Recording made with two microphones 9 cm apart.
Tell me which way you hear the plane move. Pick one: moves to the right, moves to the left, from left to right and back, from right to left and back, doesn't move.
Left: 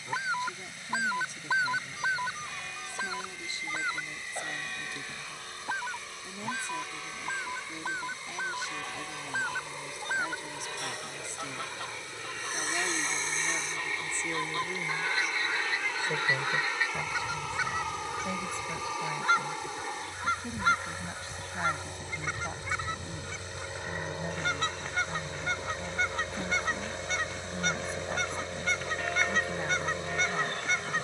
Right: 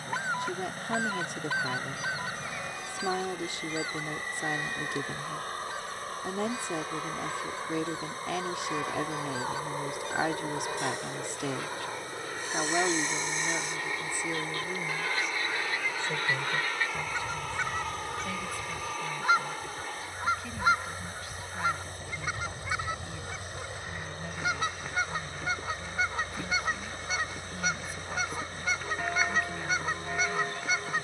moves to the left.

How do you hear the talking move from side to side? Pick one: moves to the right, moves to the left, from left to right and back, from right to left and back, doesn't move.
moves to the left.